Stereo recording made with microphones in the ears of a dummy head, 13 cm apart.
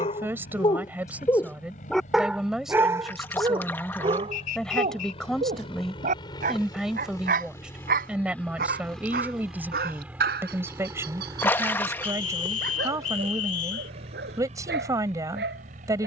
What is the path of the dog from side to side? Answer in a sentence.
You can hear the dog go from the left side to the right.